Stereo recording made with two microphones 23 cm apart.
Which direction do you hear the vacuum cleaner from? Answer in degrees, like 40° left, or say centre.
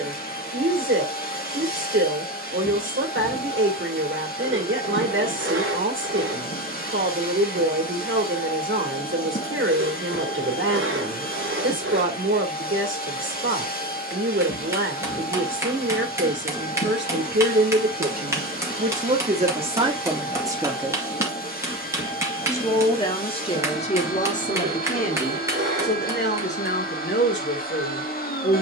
40° left.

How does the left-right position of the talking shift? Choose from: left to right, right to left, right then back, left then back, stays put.
right to left.